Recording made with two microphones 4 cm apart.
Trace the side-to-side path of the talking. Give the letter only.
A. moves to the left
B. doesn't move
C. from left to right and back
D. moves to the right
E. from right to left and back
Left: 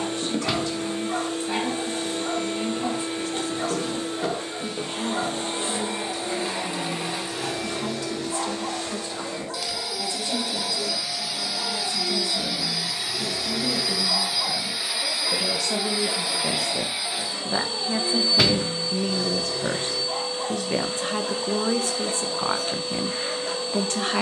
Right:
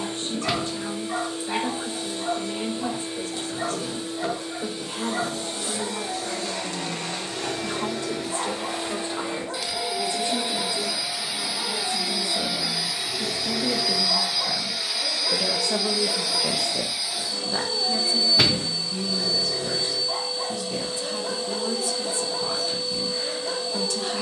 A.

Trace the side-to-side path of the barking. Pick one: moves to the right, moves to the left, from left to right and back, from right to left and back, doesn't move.
doesn't move.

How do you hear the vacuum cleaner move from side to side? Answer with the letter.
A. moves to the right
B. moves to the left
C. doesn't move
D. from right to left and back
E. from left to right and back
E.